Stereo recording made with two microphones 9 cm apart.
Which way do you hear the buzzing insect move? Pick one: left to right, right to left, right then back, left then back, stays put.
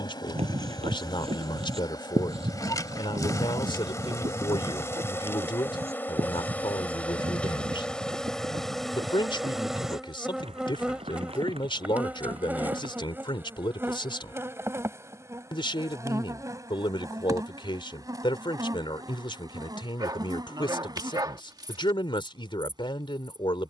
left to right.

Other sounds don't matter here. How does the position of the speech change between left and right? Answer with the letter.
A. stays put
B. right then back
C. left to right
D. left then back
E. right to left
A.